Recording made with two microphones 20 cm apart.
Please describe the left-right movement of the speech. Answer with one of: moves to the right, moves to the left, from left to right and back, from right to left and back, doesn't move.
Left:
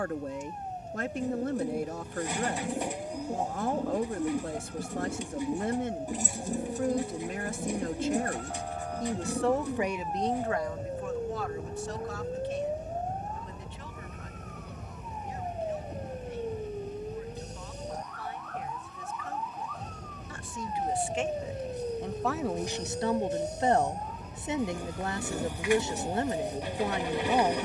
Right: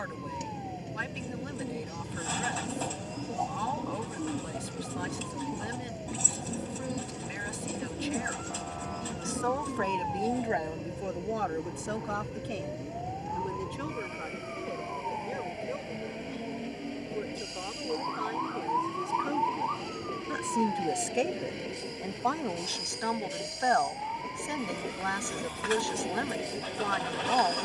from left to right and back.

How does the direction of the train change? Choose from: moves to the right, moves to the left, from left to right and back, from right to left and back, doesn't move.
doesn't move.